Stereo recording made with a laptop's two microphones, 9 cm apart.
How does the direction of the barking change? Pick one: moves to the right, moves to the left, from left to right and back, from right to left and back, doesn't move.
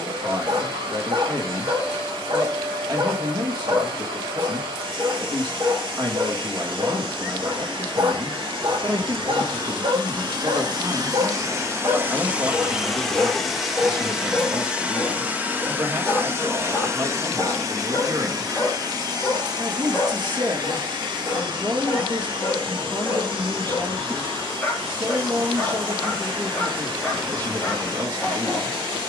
moves to the left.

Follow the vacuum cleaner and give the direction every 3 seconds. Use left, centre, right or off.
right, right, right, right, centre, right, right, right, right, right.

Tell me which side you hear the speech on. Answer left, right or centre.
right.